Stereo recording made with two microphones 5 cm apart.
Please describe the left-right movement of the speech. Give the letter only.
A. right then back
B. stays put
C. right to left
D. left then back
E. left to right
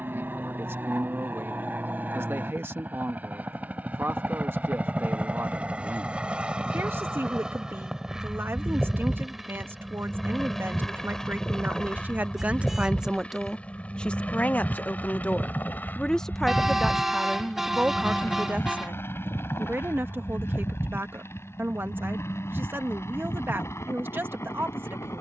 D.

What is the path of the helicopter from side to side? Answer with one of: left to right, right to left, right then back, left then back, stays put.
right to left.